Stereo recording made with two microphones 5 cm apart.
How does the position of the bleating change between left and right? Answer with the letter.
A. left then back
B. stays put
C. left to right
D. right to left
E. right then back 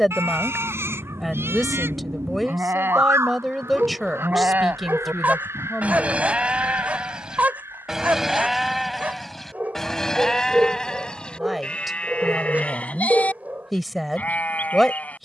D.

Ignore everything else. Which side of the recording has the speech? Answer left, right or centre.
centre.